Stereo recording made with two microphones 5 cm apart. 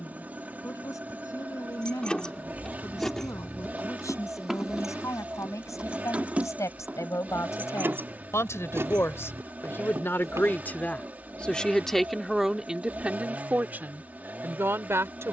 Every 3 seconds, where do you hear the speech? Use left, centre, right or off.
left, left, left, left, right.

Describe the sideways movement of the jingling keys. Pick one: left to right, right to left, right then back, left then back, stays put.
left to right.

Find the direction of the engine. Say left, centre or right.
right.